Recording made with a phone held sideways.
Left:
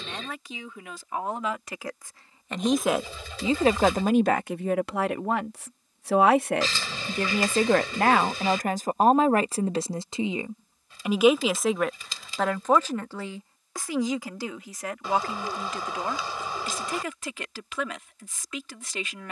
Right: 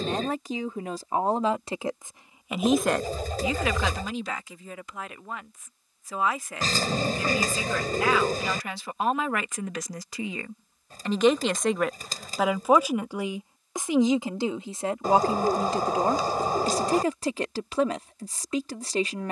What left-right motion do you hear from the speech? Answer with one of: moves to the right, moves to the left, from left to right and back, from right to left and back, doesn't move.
from right to left and back.